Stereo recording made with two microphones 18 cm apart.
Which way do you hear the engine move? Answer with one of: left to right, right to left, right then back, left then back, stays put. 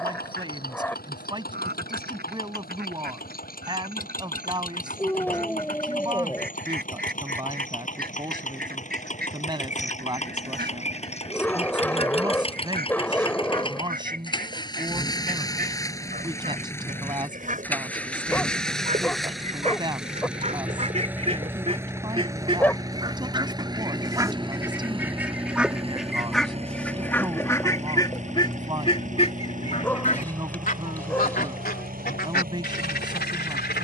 left to right.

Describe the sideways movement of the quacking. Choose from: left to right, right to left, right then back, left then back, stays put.
right to left.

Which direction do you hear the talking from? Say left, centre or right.
right.